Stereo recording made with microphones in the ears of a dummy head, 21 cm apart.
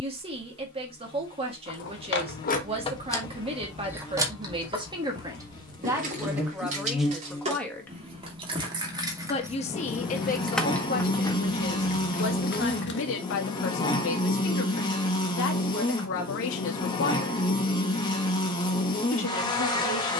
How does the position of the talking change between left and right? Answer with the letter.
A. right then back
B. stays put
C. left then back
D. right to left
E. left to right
D.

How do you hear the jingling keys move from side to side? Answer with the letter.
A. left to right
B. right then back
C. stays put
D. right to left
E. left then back
B.